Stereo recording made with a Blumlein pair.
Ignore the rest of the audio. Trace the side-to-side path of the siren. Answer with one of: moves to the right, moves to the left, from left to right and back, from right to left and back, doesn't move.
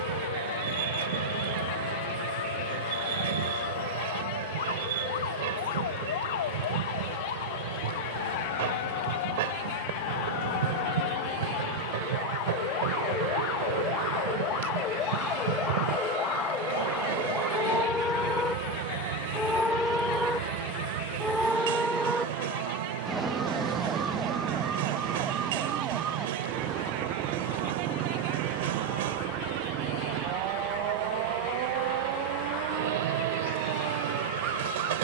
moves to the right.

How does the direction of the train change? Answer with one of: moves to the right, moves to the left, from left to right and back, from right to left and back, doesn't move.
doesn't move.